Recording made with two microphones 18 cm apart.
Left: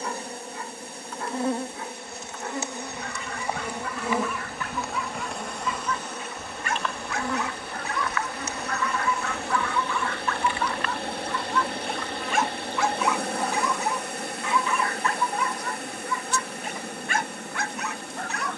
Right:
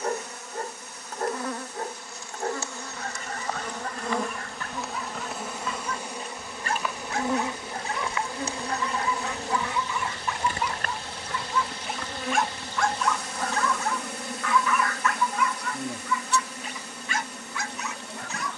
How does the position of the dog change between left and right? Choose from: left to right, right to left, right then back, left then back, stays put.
right to left.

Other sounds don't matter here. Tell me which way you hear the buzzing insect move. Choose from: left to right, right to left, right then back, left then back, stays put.
left to right.